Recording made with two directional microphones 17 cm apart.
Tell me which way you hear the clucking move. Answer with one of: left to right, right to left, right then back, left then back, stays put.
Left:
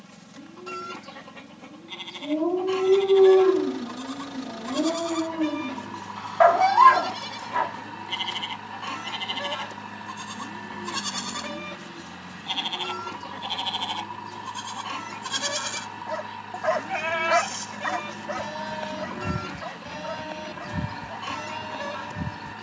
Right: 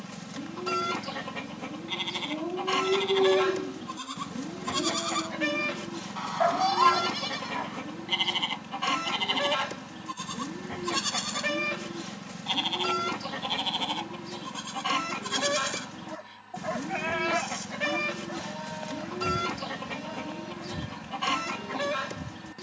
stays put.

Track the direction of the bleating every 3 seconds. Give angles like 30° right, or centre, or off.
30° right, 30° right, 20° right, 10° right, centre, 20° left, 40° left, 50° left.